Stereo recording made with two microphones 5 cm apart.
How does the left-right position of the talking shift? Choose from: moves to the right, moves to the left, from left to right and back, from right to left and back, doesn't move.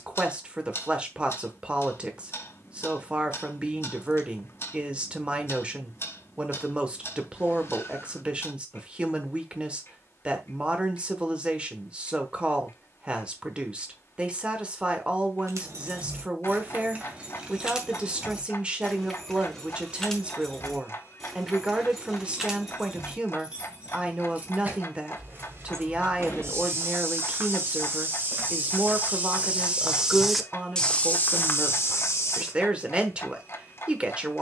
doesn't move.